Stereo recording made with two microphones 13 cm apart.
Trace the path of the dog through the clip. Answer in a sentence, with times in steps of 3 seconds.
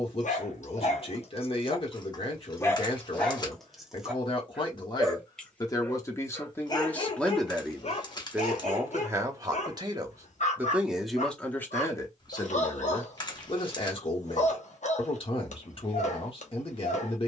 You can hear the dog on the left from 0 s, in the centre from 3 s and on the left from 6 s.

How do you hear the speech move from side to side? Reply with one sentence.
You can hear the speech move from left to right and back again.